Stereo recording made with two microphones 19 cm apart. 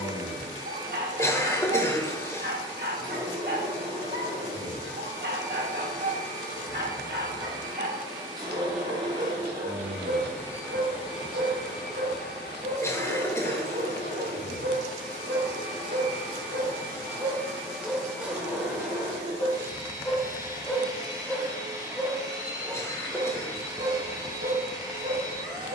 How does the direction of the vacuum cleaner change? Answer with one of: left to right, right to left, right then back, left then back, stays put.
left then back.